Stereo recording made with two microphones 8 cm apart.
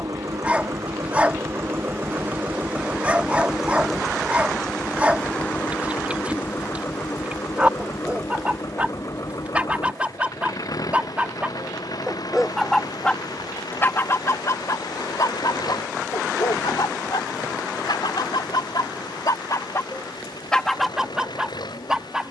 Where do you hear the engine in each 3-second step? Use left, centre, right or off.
right, centre, left, left, left, left, left, left.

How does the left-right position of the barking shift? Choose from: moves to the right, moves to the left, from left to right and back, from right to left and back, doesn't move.
from right to left and back.